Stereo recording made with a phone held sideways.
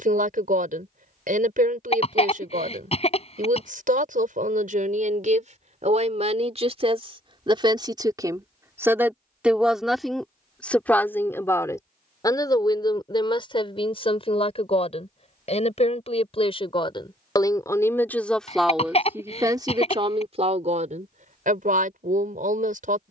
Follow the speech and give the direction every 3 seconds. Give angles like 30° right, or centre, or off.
60° right, 60° right, 30° right, 10° left, 30° left, 30° left, 20° right, 60° right.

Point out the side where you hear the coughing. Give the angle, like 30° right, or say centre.
40° left.